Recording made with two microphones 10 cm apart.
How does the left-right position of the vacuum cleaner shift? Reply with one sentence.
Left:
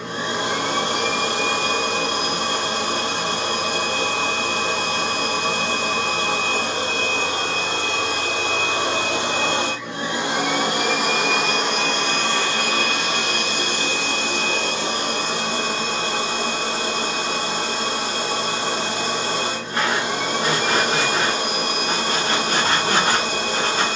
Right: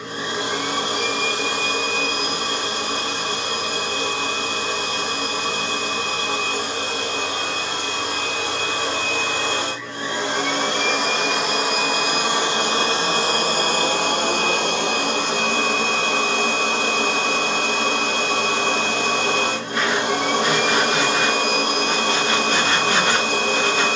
In this clip you hear the vacuum cleaner go from the left side to the right.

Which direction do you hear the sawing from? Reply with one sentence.
You can hear the sawing on the left.